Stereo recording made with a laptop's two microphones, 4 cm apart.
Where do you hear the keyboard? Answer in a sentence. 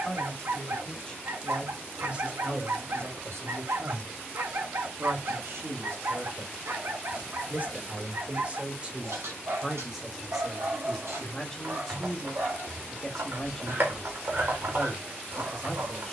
You can hear the keyboard on the right.